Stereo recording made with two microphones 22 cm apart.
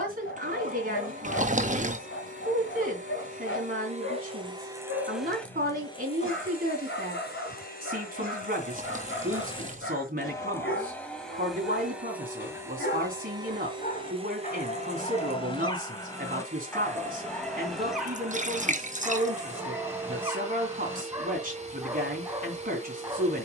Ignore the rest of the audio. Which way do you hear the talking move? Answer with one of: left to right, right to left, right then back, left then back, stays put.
stays put.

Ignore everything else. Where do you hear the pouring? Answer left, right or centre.
right.